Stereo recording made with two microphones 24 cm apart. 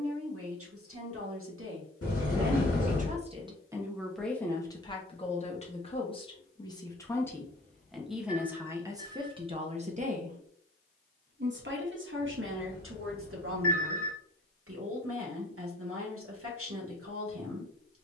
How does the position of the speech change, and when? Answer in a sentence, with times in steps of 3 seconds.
You can hear the speech on the right from 0 s, in the centre from 3 s and on the right from 9 s.